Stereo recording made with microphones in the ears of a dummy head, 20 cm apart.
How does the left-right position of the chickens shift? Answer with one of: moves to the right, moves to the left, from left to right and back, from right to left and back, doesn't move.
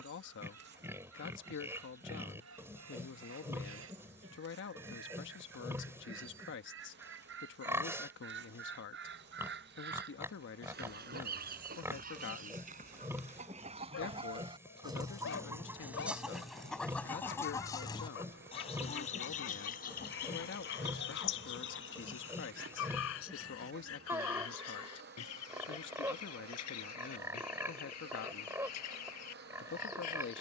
moves to the left.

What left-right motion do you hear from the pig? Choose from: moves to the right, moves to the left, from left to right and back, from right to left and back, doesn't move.
doesn't move.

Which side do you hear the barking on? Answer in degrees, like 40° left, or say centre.
60° left.